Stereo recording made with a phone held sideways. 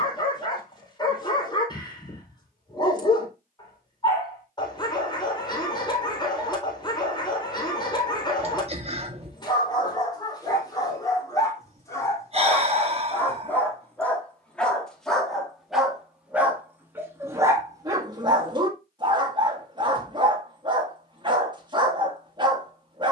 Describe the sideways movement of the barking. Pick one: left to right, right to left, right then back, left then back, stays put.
left to right.